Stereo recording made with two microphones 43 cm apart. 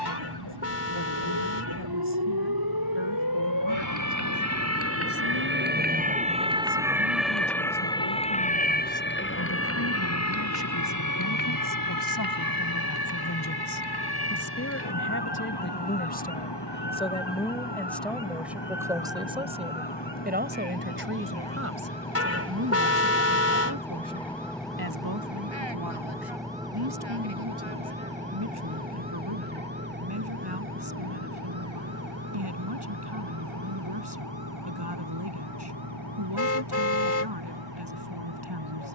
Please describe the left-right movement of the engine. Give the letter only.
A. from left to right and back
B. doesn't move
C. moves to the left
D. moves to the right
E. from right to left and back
D.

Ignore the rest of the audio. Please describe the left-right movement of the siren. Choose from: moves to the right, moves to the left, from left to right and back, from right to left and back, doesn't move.
moves to the left.